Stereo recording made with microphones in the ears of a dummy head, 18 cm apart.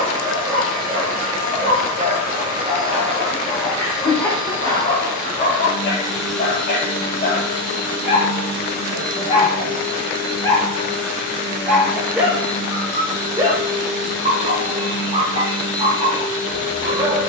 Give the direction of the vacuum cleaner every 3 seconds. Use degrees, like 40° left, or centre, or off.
40° right, 20° right, 20° left, 50° left, 60° left, 60° left.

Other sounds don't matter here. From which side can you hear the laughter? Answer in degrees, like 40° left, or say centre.
10° left.